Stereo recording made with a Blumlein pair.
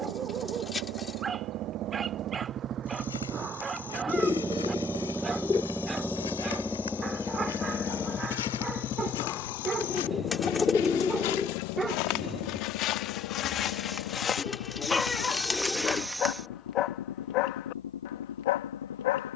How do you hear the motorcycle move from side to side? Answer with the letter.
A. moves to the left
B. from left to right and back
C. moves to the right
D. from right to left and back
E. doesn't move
A.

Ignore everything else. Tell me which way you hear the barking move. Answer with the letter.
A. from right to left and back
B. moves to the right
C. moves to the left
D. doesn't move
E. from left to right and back
C.